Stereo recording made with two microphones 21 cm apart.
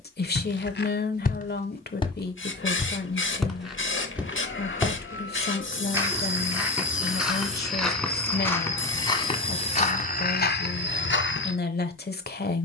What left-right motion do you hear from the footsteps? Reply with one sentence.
In this clip you hear the footsteps go right and come back.